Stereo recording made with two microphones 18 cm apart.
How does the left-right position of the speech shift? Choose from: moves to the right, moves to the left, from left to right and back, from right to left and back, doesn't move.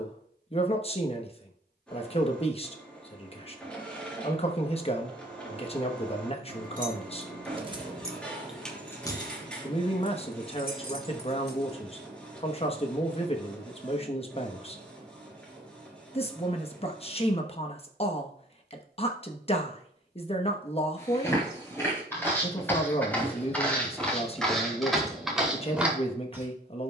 doesn't move.